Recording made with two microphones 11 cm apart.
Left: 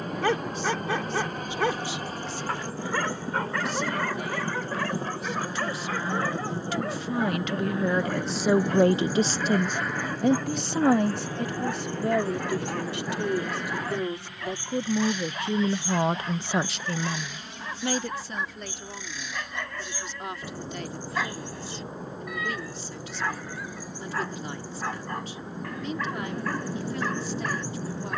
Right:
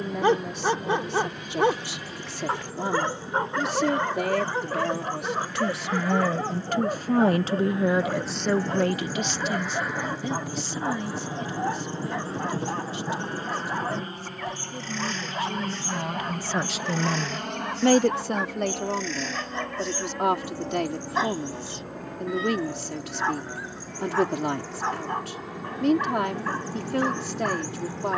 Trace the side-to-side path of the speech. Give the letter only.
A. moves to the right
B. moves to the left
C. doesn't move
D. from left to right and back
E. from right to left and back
E.